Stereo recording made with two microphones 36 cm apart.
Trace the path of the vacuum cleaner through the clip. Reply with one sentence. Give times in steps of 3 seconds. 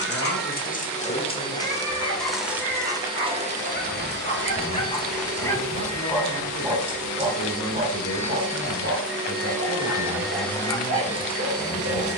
You can hear the vacuum cleaner in the centre from 0 s, on the right from 3 s and in the centre from 9 s.